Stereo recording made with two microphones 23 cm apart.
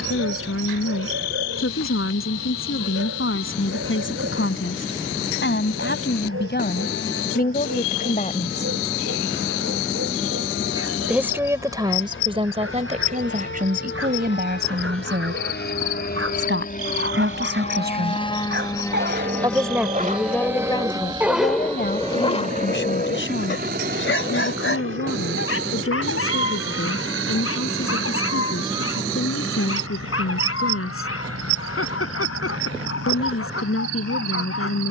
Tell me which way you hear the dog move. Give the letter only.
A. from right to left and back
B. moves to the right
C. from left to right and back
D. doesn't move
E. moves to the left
E.